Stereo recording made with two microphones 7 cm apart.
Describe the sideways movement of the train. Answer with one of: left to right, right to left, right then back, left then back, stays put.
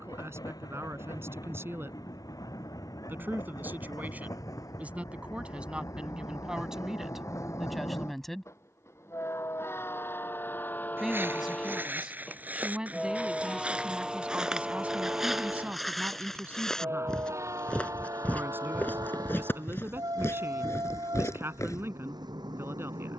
left to right.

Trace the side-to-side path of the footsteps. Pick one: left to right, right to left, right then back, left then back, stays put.
right to left.